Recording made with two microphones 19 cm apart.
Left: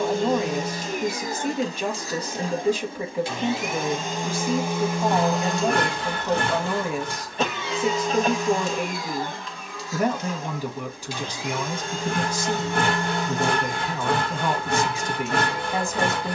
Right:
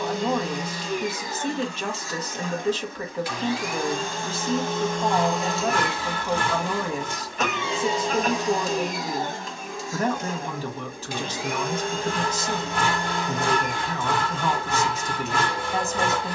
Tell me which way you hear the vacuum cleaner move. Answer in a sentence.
You can hear the vacuum cleaner travel towards the right.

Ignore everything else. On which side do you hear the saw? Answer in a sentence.
In this clip you hear the saw on the left.